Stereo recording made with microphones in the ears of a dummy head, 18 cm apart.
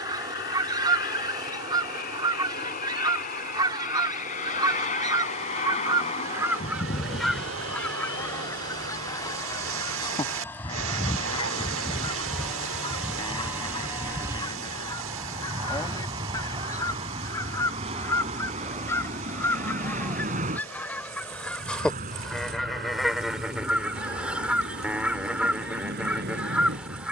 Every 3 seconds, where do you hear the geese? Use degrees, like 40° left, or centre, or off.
20° right, 20° right, centre, 20° left, 20° left, 20° left, 10° left, centre, 10° right.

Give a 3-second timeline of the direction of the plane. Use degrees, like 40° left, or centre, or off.
50° left, 40° left, 30° left, 10° left, 10° right, 20° right, 40° right, 50° right, 50° right.